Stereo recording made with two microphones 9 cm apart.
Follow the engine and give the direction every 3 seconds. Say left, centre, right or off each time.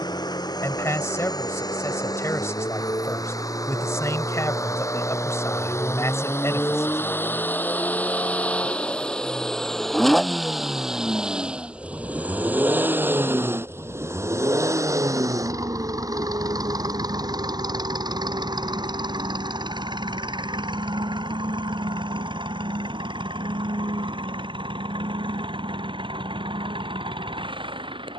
left, left, left, centre, right, right, right, right, right, right.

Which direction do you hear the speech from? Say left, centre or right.
left.